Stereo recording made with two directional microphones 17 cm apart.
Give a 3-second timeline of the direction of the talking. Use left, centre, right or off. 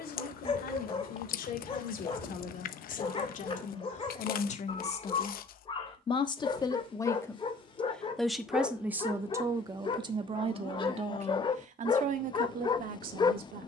left, left, centre, right, right.